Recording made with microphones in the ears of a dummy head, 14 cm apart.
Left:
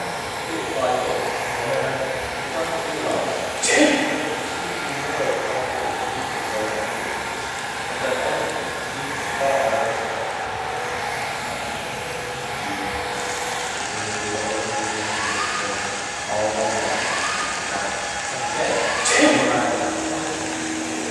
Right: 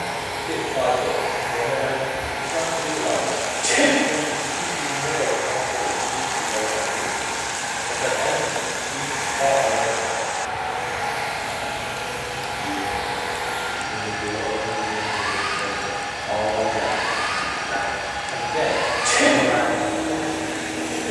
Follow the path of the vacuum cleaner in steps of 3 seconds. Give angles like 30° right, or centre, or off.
40° left, 40° left, 40° left, 40° left, 40° left, 30° left, 10° right.